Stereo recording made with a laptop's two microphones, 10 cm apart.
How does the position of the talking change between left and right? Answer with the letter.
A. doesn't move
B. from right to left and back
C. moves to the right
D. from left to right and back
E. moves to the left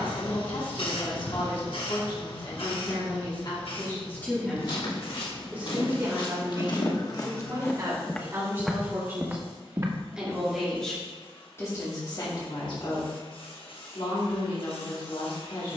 D.